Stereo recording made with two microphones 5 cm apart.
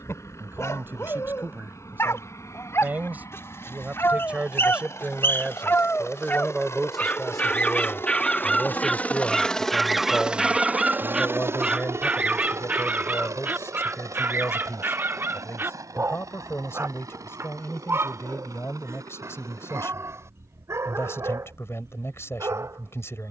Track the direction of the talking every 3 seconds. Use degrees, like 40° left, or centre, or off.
40° right, 20° right, 10° left, 40° left, 60° left, 60° left, 60° left, 60° left.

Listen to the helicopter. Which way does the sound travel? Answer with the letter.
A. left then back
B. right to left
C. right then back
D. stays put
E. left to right
E.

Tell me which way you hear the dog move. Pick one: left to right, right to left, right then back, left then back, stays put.
left to right.